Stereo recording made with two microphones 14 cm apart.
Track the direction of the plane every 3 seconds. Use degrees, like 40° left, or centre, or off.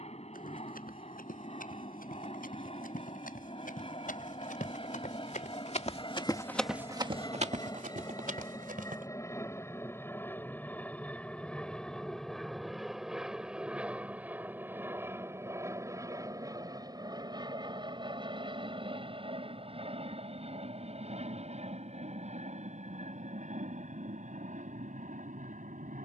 50° left, 40° left, 30° left, 10° left, 10° right, 20° right, 40° right, 50° right, 60° right.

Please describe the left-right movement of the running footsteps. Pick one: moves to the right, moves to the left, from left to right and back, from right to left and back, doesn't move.
moves to the right.